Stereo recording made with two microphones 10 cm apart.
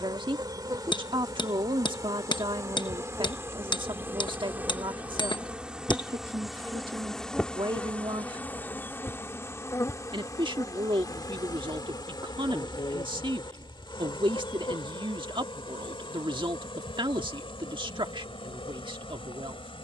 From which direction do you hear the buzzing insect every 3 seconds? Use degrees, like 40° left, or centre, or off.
40° right, 20° right, 10° left, 40° left, 50° left, 60° left, 70° left.